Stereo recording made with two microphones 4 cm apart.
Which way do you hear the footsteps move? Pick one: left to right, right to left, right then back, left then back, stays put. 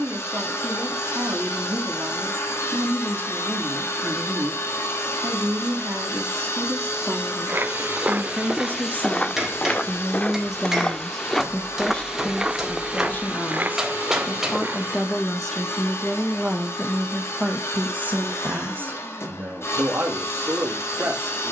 left then back.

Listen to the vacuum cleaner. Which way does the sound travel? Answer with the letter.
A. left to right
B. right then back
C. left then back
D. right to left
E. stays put
E.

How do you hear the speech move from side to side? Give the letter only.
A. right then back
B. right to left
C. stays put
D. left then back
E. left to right
D.